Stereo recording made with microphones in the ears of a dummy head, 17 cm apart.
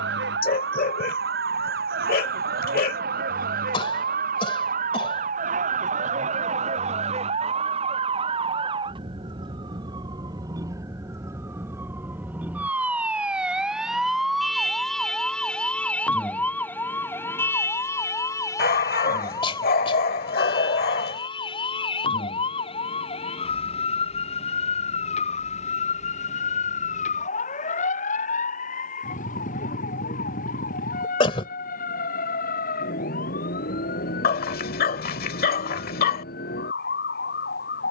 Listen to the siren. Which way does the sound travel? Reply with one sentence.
You can hear the siren go from the right side to the left.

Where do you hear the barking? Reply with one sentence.
You can hear the barking on the left.